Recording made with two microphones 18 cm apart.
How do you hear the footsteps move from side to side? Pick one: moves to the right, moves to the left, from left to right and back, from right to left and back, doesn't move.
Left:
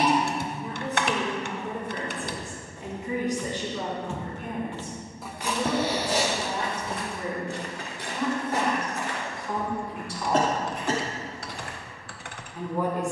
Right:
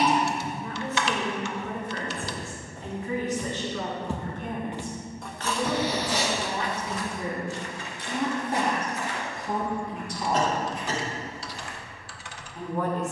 moves to the left.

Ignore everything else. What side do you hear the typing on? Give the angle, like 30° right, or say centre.
60° left.